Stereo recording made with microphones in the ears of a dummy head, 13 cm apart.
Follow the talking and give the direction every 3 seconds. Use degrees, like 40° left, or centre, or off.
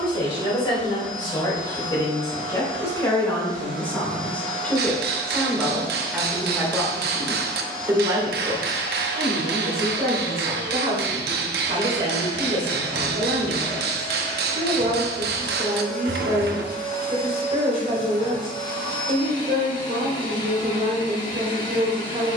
30° left, 10° left, 20° right, 40° right, 40° right, 40° right, 40° right, 40° right.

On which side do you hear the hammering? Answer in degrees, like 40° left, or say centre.
70° right.